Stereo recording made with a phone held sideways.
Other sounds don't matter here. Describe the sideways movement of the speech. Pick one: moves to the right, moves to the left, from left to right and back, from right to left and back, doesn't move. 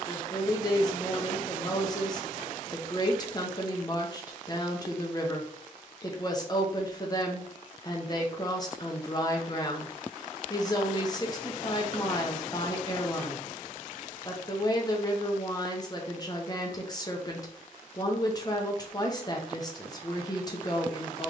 doesn't move.